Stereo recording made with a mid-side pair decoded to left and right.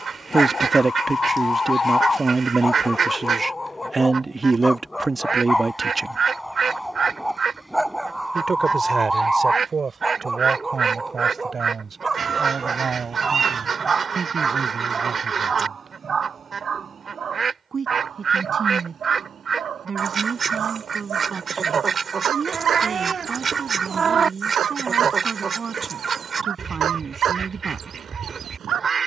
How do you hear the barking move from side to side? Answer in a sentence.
In this clip you hear the barking go from the left side to the right.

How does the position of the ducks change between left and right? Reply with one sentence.
In this clip you hear the ducks stay put.